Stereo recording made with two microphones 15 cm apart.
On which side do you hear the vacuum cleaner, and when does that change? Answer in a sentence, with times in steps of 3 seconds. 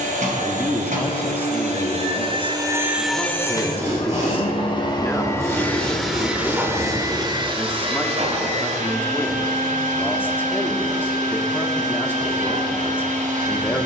You can hear the vacuum cleaner on the right from 0 s, on the left from 3 s and on the right from 6 s.